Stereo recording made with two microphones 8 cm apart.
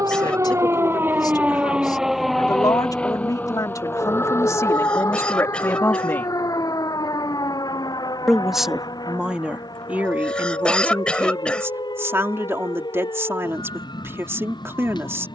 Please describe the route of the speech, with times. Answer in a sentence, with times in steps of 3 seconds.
In this clip you hear the speech on the left from 0 s, in the centre from 6 s and on the right from 9 s.